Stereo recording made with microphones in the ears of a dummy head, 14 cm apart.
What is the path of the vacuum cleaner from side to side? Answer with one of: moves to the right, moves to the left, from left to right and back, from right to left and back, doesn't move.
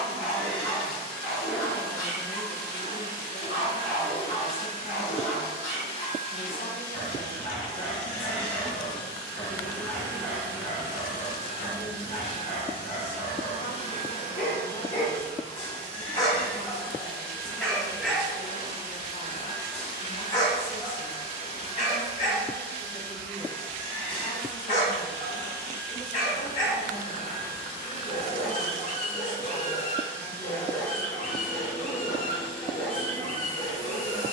doesn't move.